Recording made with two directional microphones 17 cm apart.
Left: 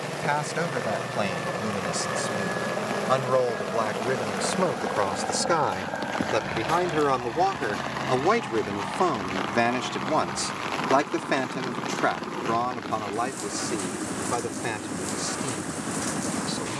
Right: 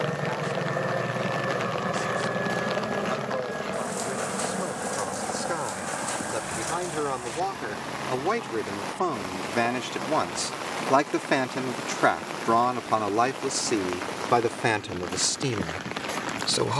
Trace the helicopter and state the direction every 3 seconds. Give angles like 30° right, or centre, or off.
20° right, 10° left, 30° left, 40° left, 50° left, 50° left.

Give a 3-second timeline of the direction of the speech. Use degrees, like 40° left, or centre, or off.
60° left, 50° left, 30° left, centre, 30° right, 50° right.